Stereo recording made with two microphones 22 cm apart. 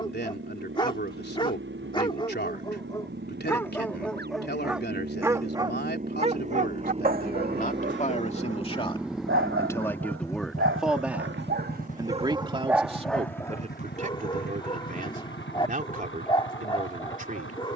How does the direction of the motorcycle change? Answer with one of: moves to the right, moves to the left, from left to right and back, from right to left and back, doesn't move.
moves to the left.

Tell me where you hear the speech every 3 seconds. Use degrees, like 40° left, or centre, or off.
50° left, 50° left, 40° left, centre, 30° right, 40° right.